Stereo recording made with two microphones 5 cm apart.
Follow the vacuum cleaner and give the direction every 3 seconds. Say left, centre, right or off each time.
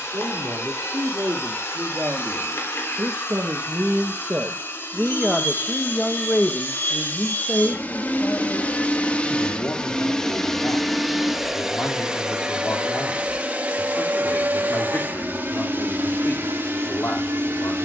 left, left, left, centre, right, right.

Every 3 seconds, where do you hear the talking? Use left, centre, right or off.
right, right, left, left, left, left.